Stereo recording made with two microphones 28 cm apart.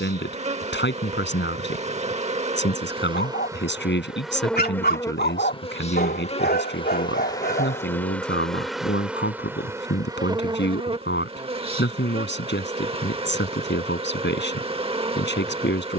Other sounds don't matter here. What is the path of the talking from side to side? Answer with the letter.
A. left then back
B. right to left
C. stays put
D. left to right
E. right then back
C.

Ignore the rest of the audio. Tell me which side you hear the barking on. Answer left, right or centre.
left.